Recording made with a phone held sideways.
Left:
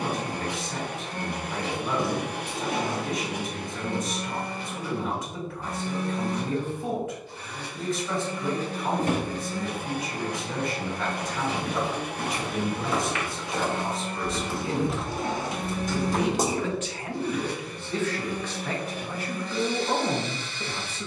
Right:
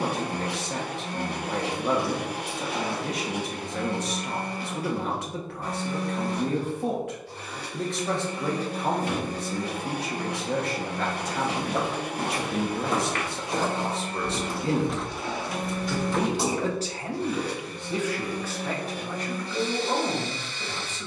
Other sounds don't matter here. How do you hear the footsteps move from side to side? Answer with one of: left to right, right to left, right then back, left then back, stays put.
right to left.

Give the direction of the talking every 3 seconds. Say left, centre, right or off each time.
right, right, right, right, right, right, centre.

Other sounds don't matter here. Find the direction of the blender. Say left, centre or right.
right.